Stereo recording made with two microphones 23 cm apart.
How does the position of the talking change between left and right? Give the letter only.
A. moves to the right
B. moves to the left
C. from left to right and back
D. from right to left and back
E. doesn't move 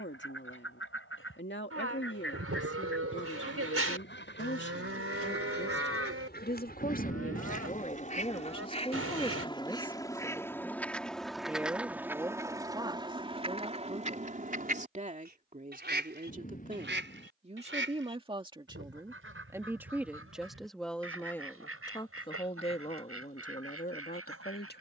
C.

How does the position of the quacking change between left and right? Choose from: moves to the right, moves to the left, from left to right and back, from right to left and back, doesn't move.
moves to the right.